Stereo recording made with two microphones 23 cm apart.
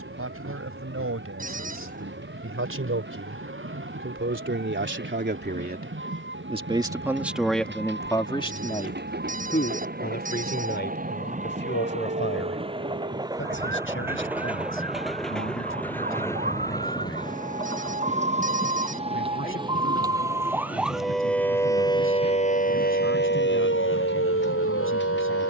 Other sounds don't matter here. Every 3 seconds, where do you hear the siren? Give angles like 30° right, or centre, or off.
60° right, 60° right, 50° right, 50° right, 50° right, 40° right, 20° right, 30° left, 70° left.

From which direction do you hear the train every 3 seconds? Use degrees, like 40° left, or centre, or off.
70° right, 70° right, 60° right, 40° right, 20° right, 10° left, 30° left, 50° left, 50° left.